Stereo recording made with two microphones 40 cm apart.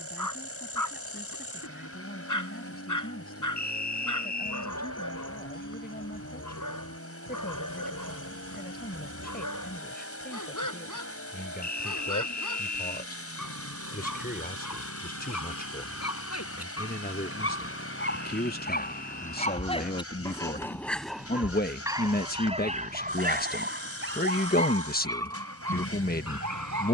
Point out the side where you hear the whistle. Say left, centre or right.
left.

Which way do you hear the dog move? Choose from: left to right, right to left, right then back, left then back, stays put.
left to right.